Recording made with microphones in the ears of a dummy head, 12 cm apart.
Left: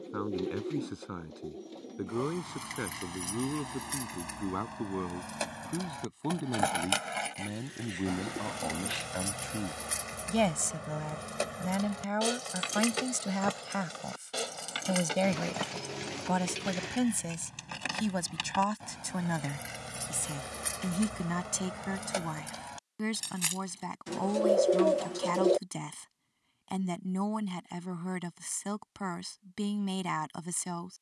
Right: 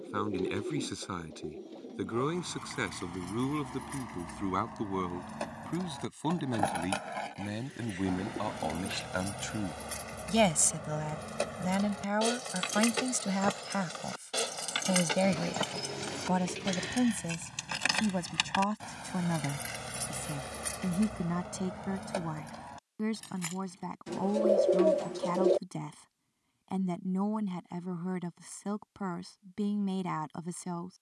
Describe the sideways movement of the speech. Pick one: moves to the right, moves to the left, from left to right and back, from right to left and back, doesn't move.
moves to the left.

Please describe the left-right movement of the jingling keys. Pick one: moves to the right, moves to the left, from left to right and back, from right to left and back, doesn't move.
from left to right and back.